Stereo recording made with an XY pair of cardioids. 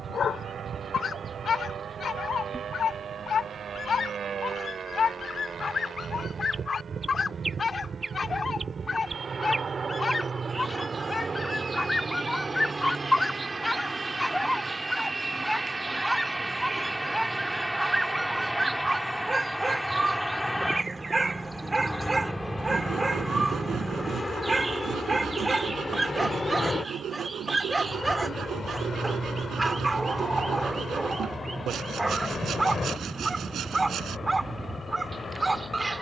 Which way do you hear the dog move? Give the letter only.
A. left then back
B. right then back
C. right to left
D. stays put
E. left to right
E.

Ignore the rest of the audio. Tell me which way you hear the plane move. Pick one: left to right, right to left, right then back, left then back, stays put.
right to left.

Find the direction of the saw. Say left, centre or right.
right.